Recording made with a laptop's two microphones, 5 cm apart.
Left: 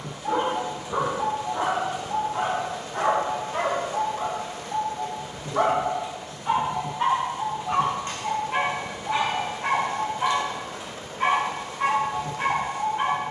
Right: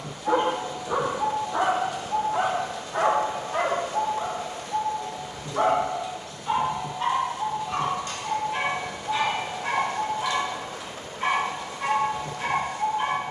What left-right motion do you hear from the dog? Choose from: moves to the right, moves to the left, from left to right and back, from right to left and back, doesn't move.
moves to the left.